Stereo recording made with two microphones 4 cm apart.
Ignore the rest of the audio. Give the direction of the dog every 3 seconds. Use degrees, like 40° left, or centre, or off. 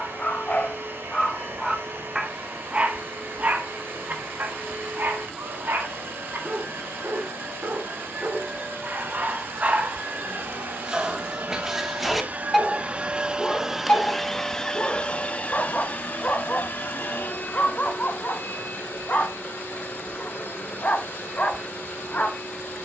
10° left, 50° right, 50° right, 20° right, 20° left, 40° left, 40° left, 40° left.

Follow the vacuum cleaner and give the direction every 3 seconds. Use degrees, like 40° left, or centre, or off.
70° right, 70° right, 70° right, 60° right, 20° right, 50° left, 70° left, 70° left.